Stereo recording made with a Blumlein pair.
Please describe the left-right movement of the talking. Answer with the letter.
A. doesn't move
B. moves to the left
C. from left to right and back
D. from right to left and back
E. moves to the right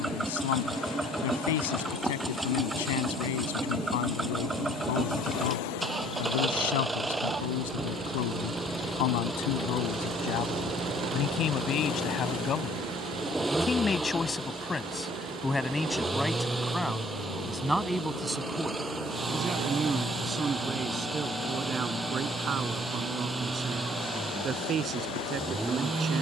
E.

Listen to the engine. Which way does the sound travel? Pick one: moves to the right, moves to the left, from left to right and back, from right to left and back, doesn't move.
doesn't move.